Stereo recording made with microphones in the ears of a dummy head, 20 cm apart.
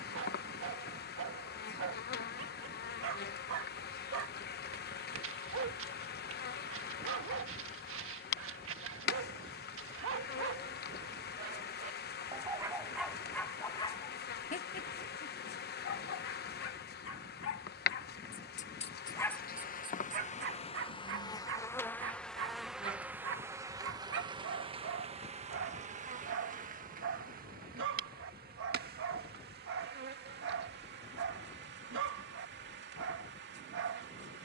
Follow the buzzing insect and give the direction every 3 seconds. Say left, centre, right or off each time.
left, left, left, left, left, left, left, centre, right, right, right, right.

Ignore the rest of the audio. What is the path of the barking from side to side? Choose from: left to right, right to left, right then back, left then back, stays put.
left then back.